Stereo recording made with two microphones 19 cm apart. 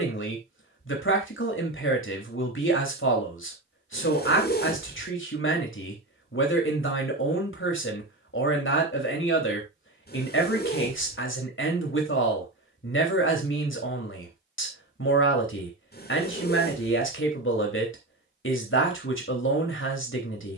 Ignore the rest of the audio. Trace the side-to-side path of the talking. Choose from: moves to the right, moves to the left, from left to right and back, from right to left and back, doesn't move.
doesn't move.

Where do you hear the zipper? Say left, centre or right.
left.